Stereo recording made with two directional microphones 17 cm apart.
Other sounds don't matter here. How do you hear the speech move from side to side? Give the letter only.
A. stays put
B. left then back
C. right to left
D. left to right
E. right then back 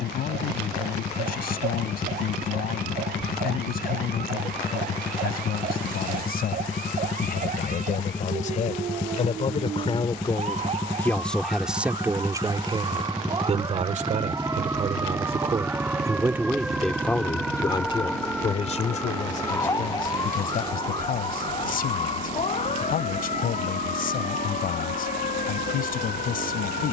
E.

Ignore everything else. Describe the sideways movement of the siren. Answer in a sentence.
In this clip you hear the siren go from the right side to the left.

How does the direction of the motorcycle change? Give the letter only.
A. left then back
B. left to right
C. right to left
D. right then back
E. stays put
B.